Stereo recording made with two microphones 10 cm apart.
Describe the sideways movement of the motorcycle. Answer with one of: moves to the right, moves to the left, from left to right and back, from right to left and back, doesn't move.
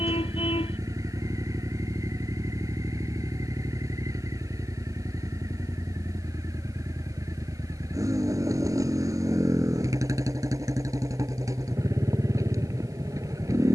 doesn't move.